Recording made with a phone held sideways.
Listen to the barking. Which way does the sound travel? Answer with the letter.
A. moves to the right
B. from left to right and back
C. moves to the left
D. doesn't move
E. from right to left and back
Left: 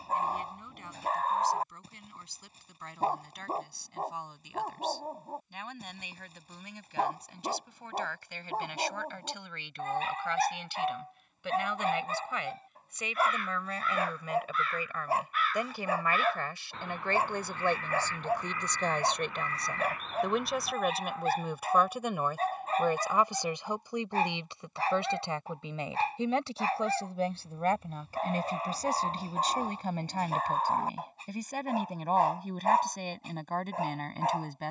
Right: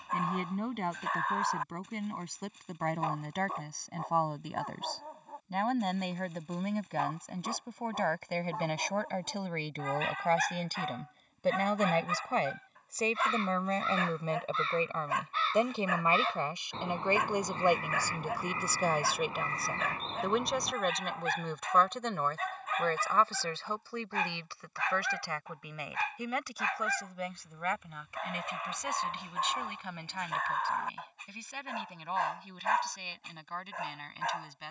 D.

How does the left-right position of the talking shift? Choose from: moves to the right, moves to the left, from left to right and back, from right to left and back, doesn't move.
moves to the left.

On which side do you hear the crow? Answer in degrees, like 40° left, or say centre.
30° right.